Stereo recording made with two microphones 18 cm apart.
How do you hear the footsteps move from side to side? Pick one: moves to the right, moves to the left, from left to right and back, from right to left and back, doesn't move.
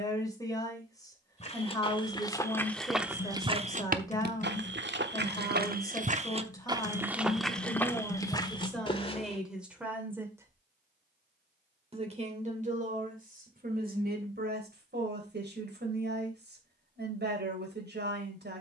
from left to right and back.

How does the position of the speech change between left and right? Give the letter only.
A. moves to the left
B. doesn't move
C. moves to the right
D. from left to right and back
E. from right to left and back
C.